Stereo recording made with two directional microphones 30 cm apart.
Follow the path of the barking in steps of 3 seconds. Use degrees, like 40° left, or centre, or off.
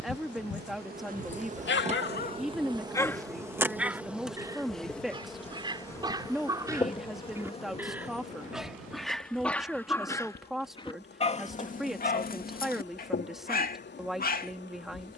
30° left, 10° right, 10° right, 10° left, 30° left.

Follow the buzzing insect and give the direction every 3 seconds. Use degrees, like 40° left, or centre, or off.
20° right, centre, 20° left, 30° left, 40° left.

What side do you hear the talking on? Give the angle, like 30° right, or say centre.
centre.